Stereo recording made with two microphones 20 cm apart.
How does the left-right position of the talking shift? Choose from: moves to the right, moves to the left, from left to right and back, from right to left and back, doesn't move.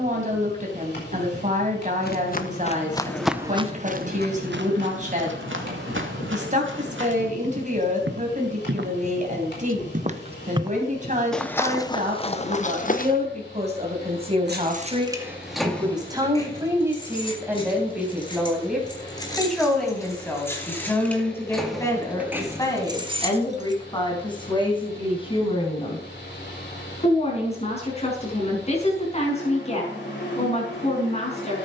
moves to the left.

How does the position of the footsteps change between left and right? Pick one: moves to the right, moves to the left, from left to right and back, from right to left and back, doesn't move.
from left to right and back.